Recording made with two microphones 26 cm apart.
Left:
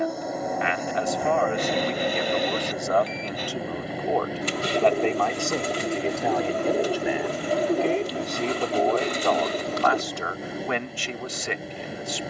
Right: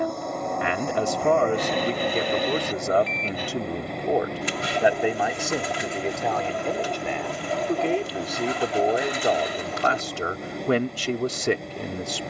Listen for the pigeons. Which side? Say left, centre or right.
left.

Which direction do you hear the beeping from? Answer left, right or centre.
right.